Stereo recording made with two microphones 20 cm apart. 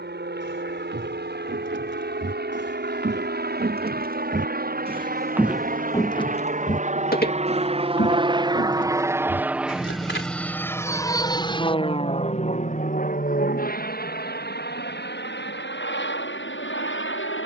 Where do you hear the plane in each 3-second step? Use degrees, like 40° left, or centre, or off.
70° right, 60° right, 30° right, 10° left, 40° left, 60° left.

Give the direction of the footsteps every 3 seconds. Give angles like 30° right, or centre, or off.
70° right, 40° right, 50° left, 70° left, off, off.